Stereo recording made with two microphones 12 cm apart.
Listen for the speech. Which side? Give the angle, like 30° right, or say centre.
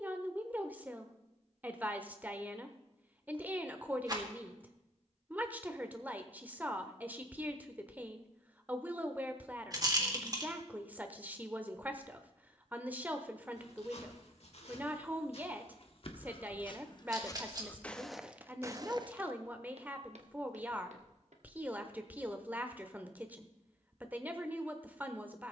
10° right.